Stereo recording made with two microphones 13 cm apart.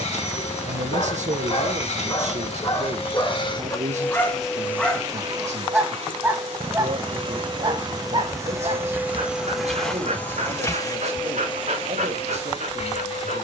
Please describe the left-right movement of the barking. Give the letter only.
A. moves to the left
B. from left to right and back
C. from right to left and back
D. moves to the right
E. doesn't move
D.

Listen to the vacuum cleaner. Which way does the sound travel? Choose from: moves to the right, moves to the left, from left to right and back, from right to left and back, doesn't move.
from left to right and back.